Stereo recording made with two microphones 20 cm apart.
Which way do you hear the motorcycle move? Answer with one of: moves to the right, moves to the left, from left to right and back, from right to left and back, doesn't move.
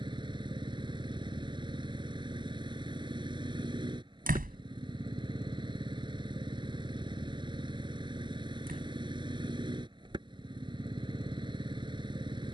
doesn't move.